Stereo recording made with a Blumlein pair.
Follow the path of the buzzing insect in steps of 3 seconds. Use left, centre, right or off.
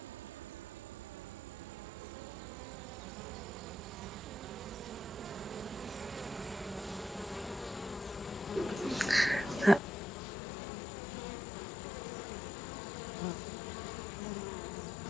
right, right, centre, left, left.